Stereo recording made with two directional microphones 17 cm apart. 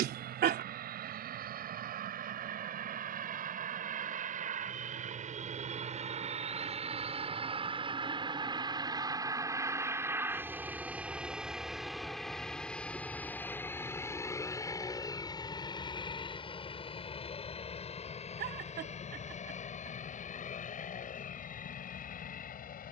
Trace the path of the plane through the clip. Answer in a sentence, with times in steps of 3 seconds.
You can hear the plane on the right from 0 s, in the centre from 9 s and on the left from 15 s.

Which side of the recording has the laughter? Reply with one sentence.
In this clip you hear the laughter on the right.